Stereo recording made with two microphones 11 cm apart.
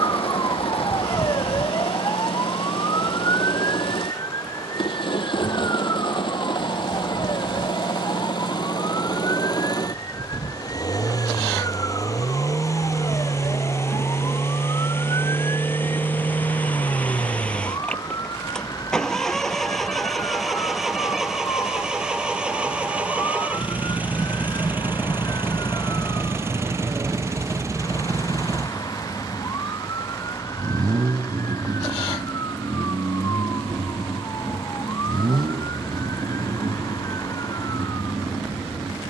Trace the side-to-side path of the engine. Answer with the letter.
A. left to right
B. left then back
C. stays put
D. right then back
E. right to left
A.